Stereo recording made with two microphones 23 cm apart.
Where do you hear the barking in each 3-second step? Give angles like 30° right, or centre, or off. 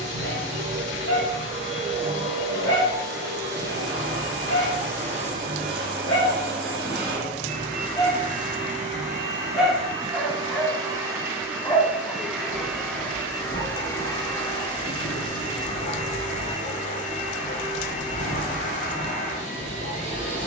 70° left, 70° left, 30° left, centre, 40° left, 60° left, 60° left.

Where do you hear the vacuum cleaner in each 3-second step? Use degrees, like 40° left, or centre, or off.
50° right, 50° right, 40° right, 20° right, 10° left, 30° left, 30° left.